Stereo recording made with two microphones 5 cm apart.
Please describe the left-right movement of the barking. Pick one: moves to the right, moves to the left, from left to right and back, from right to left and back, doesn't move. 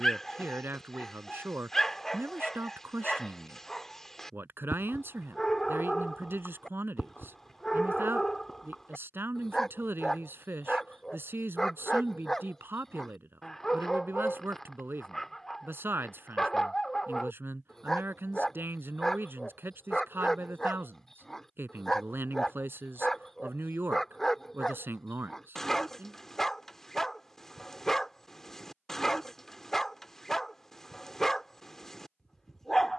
doesn't move.